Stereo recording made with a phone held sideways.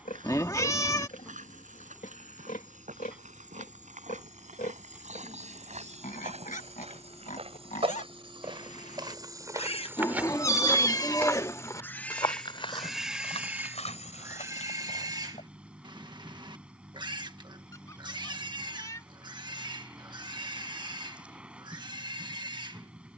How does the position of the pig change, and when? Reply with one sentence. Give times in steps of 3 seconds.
In this clip you hear the pig on the left from 0 s, in the centre from 12 s and on the right from 15 s.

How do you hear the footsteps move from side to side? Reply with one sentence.
In this clip you hear the footsteps move from right to left.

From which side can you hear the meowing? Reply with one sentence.
You can hear the meowing on the left.